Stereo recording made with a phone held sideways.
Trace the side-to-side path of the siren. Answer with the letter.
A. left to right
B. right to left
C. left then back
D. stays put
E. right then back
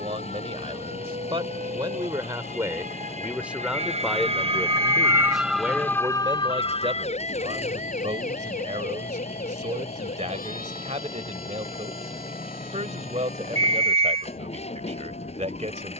B.